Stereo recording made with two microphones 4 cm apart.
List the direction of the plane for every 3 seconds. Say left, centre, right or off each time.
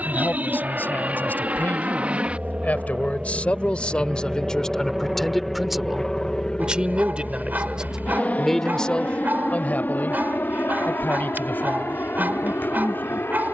right, centre, left, left, left.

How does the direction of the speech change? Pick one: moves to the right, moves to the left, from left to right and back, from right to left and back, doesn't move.
from left to right and back.